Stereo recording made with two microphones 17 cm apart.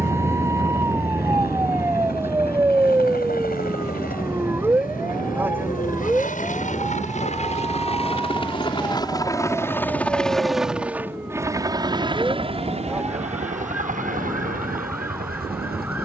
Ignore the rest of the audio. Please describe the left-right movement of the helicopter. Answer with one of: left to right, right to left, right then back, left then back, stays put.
left to right.